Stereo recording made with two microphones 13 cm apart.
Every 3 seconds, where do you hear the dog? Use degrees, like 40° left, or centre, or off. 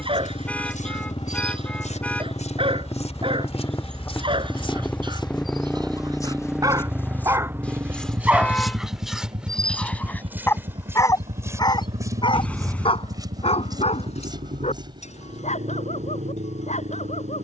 40° right, 40° right, 20° right, 20° left, 50° left, 70° left.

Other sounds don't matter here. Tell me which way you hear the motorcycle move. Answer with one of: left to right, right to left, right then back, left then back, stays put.
left to right.